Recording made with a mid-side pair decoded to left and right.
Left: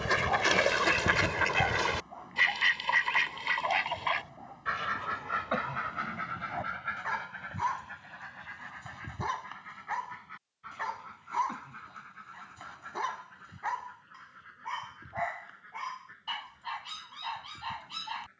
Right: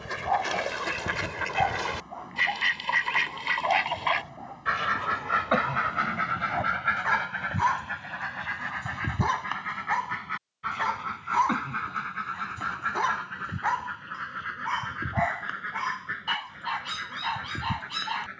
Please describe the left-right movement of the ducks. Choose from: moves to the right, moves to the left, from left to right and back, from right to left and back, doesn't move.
moves to the right.